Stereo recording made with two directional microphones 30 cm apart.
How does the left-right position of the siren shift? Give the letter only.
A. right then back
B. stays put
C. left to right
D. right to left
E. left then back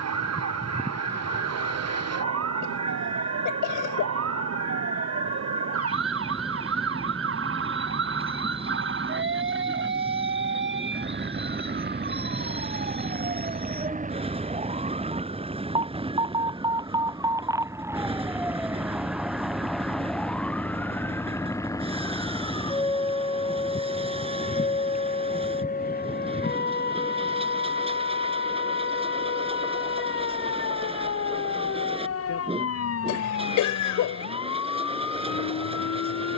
D.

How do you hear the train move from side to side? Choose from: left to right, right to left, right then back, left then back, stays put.
stays put.